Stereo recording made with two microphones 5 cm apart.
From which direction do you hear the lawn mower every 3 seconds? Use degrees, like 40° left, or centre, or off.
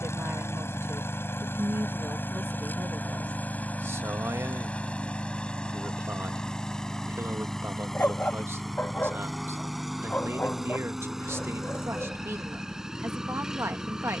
50° left, 30° left, 10° left, centre, 10° right.